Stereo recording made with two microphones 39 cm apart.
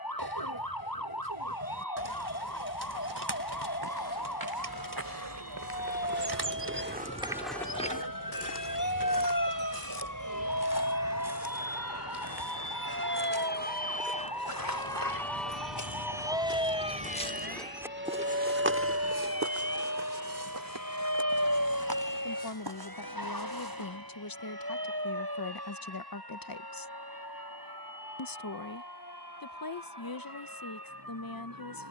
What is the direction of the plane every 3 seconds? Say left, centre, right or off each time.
left, left, left, left, left, centre, right, right, right, right, right.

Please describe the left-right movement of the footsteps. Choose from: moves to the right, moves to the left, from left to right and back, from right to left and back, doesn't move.
from right to left and back.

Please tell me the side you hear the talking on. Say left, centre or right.
left.